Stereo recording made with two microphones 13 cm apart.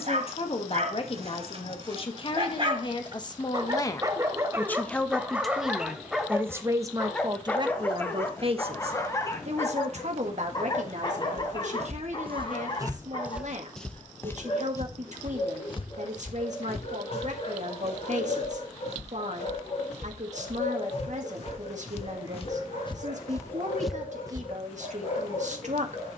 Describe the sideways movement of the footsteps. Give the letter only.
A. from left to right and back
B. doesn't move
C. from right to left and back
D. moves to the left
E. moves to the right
C.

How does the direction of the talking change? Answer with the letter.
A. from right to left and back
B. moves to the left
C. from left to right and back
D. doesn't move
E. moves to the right
E.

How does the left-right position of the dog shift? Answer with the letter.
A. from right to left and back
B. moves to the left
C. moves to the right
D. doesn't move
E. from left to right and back
B.